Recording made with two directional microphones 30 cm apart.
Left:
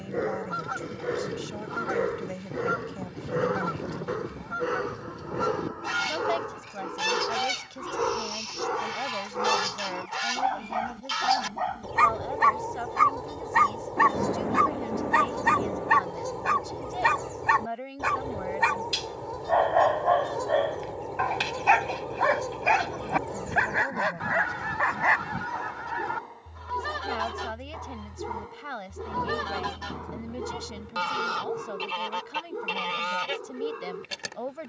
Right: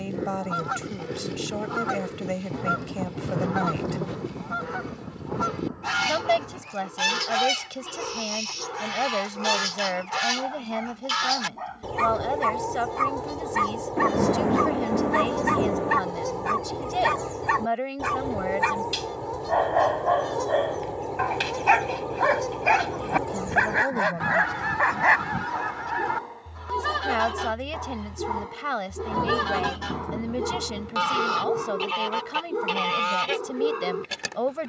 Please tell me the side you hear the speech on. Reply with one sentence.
You can hear the speech on the right.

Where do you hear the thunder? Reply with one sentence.
You can hear the thunder on the right.